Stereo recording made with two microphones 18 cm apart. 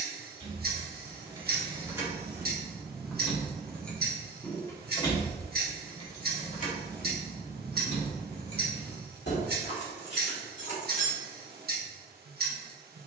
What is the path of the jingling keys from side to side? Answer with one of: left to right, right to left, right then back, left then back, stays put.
right to left.